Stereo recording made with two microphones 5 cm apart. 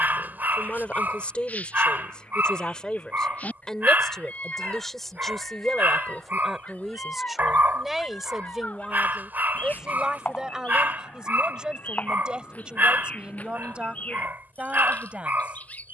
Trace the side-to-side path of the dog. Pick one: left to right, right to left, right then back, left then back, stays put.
stays put.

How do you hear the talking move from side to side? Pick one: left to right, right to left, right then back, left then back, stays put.
left to right.